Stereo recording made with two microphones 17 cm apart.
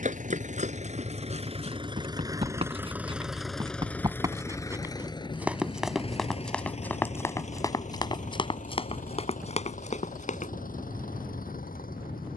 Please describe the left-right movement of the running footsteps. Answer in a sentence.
In this clip you hear the running footsteps move from right to left.